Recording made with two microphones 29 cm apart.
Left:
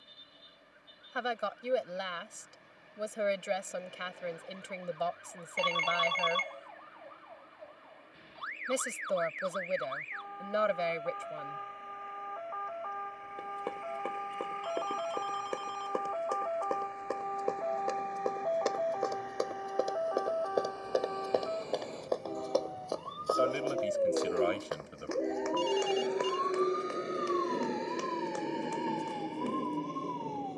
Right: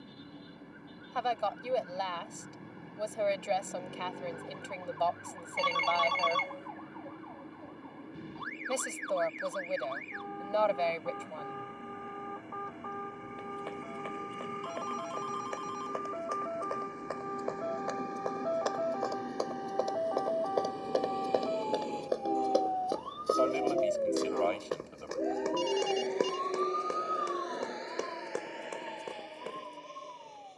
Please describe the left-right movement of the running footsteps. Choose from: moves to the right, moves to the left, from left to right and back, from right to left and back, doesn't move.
moves to the right.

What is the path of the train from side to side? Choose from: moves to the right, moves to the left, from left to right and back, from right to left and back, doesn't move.
moves to the left.